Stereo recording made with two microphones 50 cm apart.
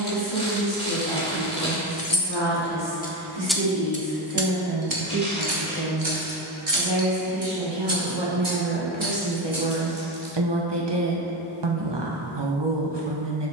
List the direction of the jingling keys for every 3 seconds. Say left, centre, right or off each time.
left, right, right, right, off.